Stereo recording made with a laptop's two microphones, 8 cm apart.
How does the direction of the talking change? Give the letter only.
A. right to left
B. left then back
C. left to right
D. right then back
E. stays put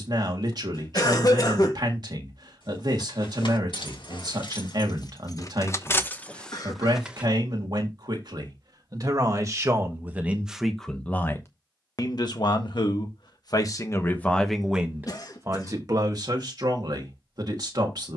B.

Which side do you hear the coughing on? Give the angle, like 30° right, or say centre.
50° left.